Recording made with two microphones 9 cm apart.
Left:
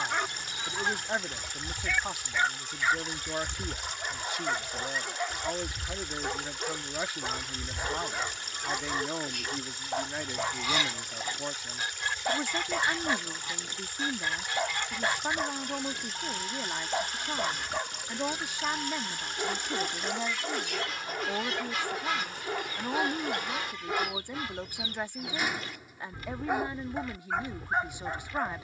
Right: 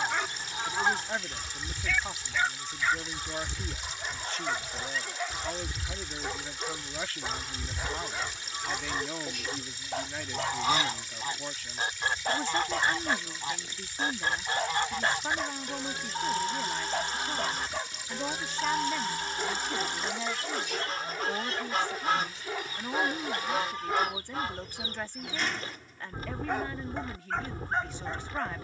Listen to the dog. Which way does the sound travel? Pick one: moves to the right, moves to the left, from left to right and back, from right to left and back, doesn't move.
doesn't move.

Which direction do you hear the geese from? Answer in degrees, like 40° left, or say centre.
40° right.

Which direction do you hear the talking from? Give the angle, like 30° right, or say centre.
10° left.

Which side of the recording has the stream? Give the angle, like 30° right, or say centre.
60° left.